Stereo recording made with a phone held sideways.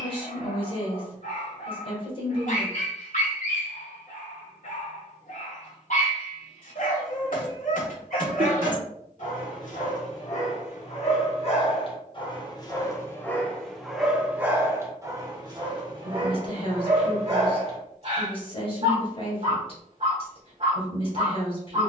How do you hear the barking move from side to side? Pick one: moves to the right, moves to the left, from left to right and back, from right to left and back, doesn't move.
moves to the right.